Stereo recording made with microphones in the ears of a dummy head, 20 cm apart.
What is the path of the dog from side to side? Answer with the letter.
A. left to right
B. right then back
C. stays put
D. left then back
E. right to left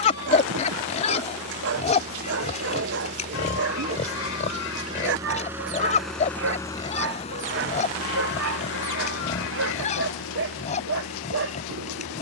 C.